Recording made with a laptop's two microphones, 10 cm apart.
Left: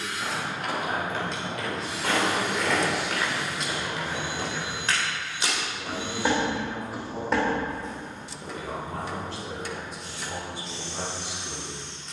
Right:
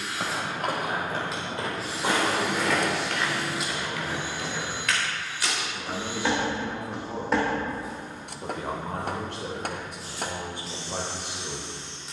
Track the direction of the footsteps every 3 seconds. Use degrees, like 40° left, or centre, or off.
30° right, 20° left, 10° right, 40° right.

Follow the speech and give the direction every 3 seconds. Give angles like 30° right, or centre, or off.
20° left, centre, 40° right, 60° right.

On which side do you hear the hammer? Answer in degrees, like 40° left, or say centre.
50° right.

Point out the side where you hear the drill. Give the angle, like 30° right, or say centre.
centre.